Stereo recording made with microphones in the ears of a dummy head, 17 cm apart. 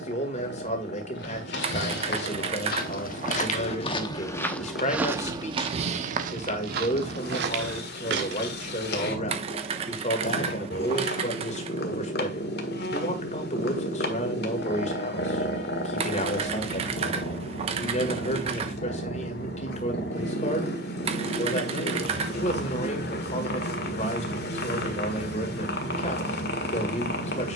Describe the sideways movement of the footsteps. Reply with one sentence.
You can hear the footsteps travel towards the right.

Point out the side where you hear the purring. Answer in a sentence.
You can hear the purring on the left.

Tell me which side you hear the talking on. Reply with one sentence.
In this clip you hear the talking on the left.